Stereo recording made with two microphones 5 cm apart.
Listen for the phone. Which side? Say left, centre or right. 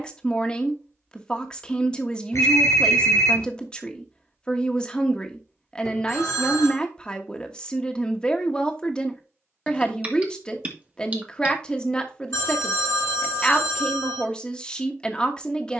left.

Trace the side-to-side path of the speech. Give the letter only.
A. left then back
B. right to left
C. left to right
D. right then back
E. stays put
E.